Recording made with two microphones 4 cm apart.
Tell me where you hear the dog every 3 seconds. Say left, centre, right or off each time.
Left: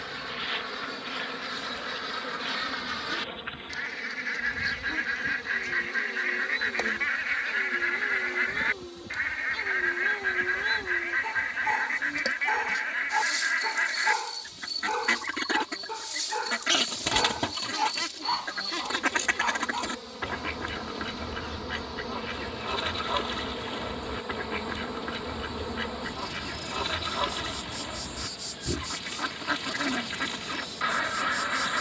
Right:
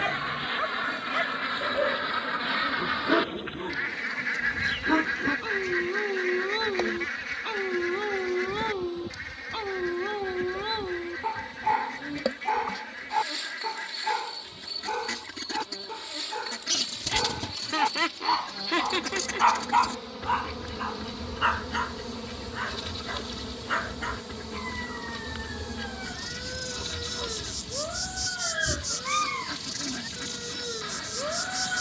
right, right, right, right, centre, centre, right, right, right, right, right.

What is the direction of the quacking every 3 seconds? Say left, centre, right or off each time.
right, centre, left, left, left, left, left, left, left, left, left.